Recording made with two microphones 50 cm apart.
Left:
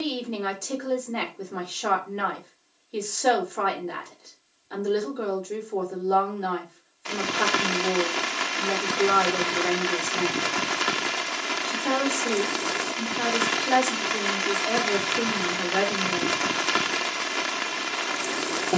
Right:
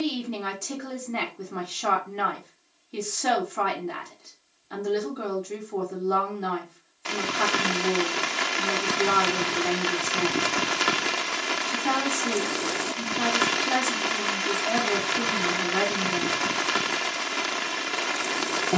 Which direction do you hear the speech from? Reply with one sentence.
You can hear the speech on the right.